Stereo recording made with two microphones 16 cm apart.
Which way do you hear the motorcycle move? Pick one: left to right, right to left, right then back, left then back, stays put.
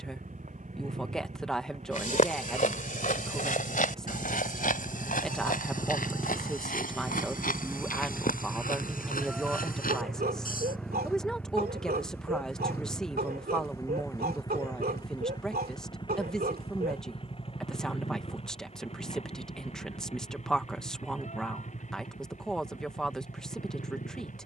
right to left.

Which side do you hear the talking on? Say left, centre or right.
centre.